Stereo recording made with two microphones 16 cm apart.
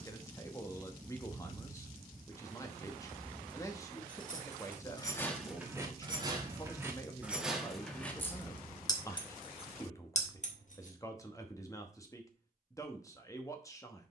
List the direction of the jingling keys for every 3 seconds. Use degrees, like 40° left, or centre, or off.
off, 20° left, 10° right, 50° left, off.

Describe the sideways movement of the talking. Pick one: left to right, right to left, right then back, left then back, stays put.
stays put.